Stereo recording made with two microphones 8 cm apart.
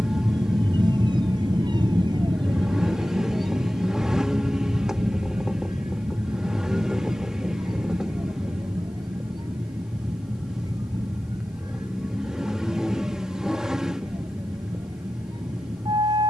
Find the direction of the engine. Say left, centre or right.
centre.